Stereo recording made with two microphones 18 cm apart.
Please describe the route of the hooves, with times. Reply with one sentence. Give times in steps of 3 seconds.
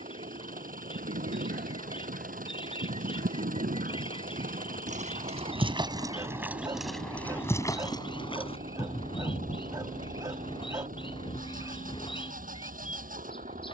You can hear the hooves on the right from 0 s, in the centre from 6 s, on the left from 9 s and not at all from 12 s.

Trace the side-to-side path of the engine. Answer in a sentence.
You can hear the engine stay in one place.